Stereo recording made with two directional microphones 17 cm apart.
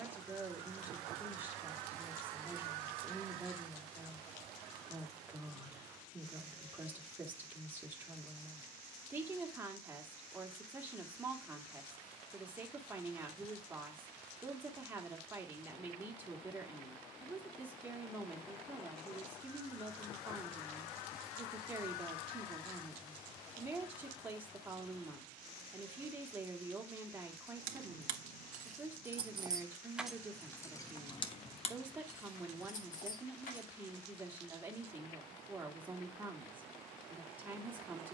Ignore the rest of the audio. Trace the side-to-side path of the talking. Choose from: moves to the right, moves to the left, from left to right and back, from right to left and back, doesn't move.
doesn't move.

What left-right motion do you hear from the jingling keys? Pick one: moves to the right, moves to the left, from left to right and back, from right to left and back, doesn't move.
moves to the left.